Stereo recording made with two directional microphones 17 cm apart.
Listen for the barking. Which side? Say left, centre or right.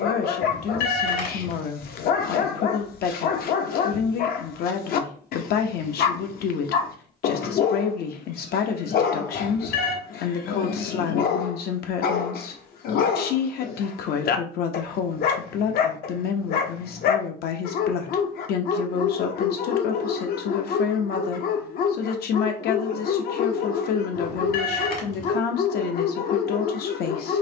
left.